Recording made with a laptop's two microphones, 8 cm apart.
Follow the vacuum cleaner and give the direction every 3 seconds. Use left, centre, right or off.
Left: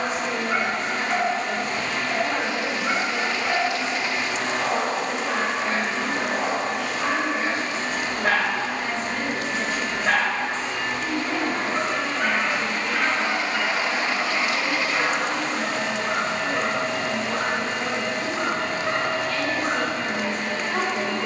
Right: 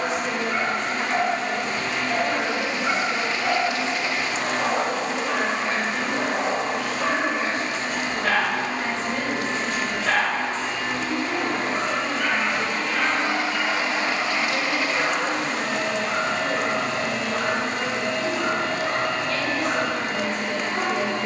right, centre, right, right, right, right, right.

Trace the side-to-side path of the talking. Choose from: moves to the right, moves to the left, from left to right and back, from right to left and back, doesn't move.
doesn't move.